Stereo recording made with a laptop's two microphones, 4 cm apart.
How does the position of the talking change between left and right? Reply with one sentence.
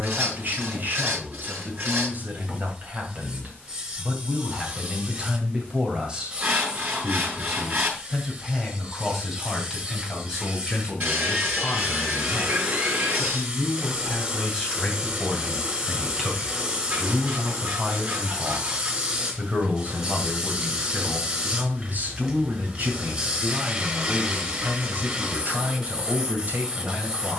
You can hear the talking move from right to left and back again.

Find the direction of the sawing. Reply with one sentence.
You can hear the sawing on the right.